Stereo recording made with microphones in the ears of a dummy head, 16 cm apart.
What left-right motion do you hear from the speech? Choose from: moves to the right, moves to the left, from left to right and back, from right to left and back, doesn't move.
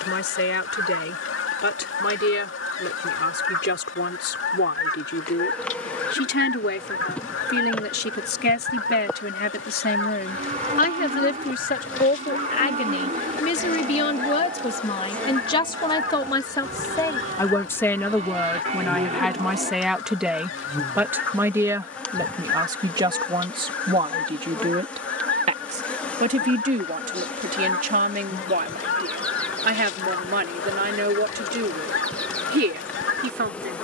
moves to the right.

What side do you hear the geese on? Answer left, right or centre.
left.